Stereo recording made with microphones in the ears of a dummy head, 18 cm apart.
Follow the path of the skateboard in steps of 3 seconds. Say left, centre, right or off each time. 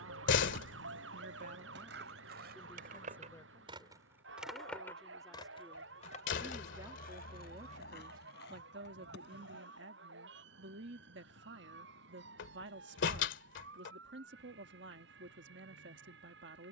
right, centre, left, left, off, off.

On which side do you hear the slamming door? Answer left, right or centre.
left.